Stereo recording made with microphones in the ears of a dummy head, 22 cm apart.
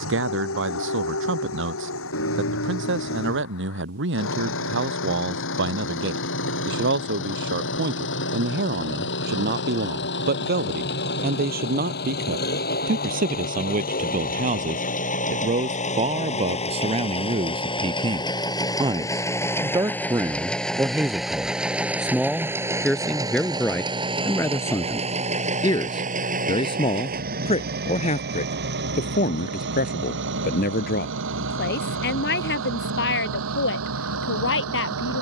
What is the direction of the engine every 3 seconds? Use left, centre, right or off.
left, left, left, left, left, left, centre, centre, right, right, right, right.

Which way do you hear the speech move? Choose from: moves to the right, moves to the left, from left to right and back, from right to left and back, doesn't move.
moves to the left.